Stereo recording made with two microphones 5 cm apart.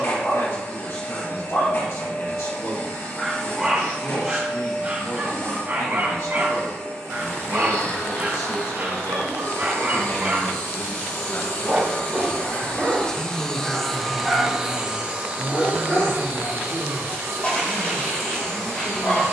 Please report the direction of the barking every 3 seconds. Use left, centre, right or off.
left, right, right, right, centre, left, left.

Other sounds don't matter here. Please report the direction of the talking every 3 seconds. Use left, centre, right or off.
left, left, left, left, centre, right, right.